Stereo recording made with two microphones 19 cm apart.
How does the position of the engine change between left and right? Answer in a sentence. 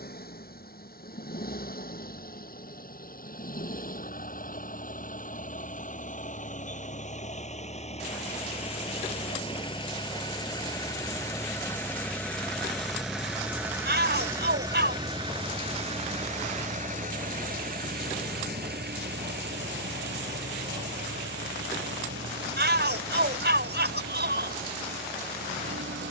In this clip you hear the engine move to the right.